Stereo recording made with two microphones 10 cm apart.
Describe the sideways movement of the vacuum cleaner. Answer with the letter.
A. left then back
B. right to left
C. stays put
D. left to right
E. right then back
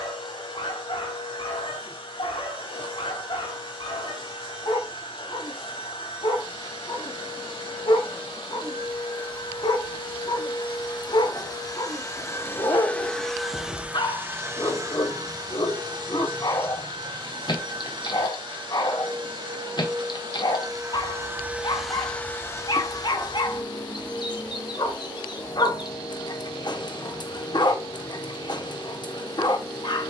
E.